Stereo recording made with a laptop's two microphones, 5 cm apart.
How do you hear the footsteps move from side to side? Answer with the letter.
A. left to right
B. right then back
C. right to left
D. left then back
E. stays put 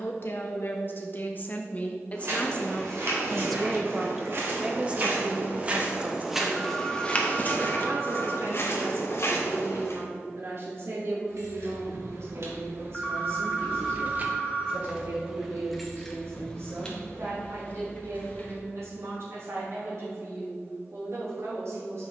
C.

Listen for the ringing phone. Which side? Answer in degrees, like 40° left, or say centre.
10° left.